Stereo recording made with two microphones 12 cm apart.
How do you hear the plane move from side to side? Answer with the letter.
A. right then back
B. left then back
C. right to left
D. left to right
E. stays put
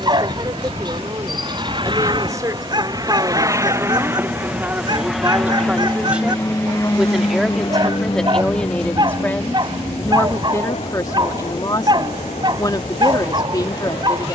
C.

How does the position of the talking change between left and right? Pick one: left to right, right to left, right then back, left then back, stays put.
right to left.